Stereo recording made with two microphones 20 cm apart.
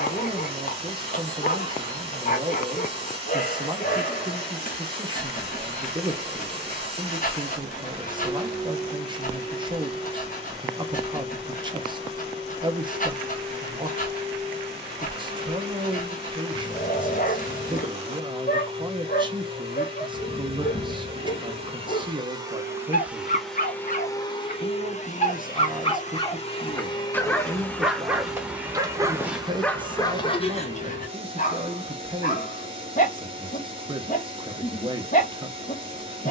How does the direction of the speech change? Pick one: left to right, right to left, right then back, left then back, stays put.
stays put.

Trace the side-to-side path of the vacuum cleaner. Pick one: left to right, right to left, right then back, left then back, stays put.
left then back.